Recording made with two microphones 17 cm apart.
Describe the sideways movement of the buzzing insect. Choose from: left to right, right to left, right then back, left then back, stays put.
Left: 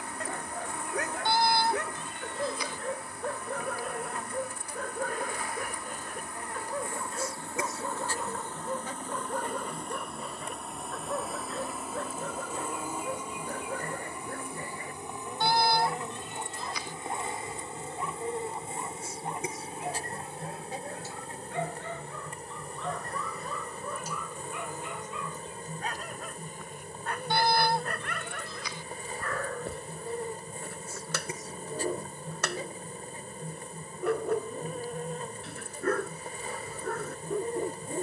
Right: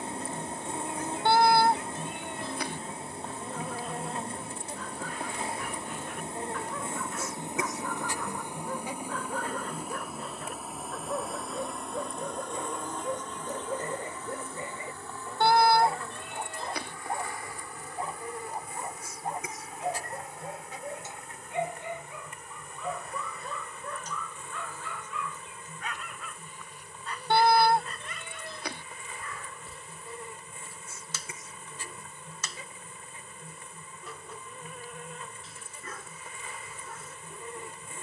right to left.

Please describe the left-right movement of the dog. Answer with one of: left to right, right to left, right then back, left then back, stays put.
right then back.